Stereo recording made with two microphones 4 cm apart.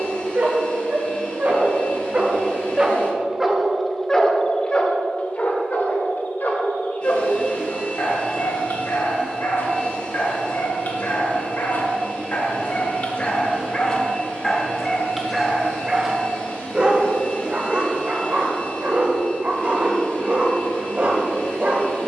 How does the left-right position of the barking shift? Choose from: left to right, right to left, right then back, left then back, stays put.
left then back.